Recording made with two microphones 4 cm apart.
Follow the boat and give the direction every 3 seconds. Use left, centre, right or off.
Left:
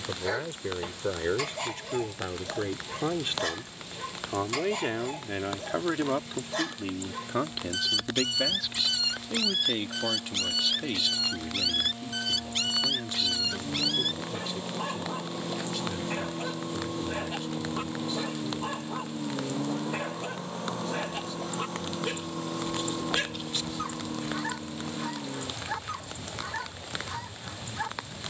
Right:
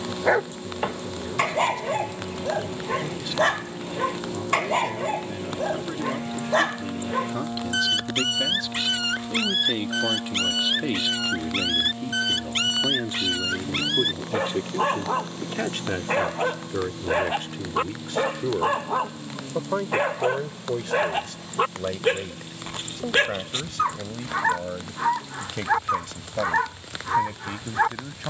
right, right, right, right, centre, left, left, left, left, left.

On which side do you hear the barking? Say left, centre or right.
right.